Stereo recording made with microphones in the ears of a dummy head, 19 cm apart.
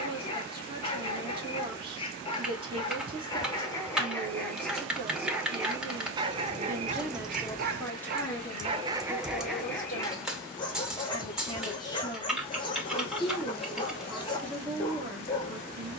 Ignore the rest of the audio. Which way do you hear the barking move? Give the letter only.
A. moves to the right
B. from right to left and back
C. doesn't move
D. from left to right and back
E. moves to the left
D.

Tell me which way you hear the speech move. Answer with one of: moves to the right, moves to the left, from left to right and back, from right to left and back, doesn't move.
from right to left and back.